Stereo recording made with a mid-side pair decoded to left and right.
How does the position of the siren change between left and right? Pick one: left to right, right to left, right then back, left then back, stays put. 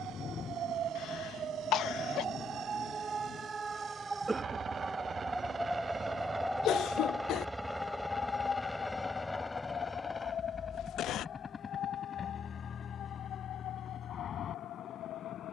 right to left.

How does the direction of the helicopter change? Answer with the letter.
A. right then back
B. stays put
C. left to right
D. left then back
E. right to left
E.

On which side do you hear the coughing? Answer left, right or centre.
left.